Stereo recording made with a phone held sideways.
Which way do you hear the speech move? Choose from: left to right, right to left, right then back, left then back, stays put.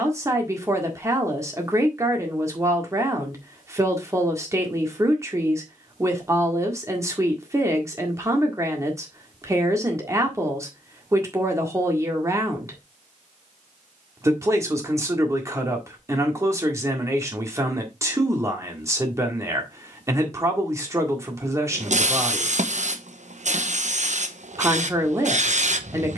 stays put.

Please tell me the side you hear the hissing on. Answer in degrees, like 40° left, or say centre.
60° right.